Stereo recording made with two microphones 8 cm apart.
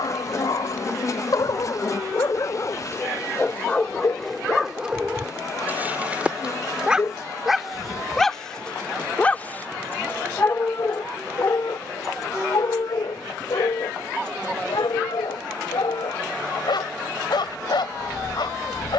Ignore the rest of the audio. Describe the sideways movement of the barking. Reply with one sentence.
You can hear the barking go right and come back.